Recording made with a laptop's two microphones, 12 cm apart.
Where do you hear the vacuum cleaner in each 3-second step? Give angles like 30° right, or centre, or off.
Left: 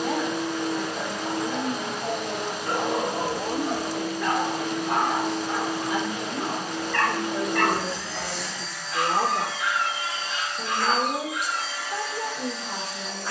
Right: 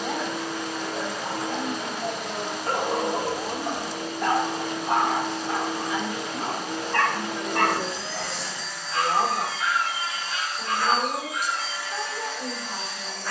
20° left, 30° right, 30° right, 10° right, 10° left.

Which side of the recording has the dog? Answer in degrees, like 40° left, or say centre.
40° right.